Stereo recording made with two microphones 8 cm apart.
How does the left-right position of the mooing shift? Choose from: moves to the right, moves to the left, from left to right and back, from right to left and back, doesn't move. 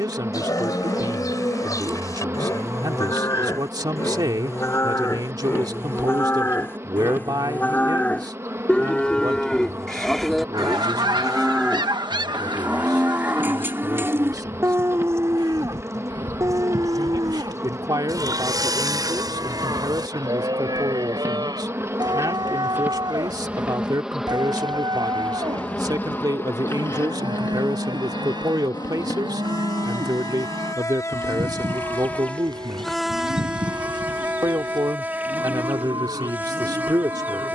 moves to the right.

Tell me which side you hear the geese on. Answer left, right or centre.
right.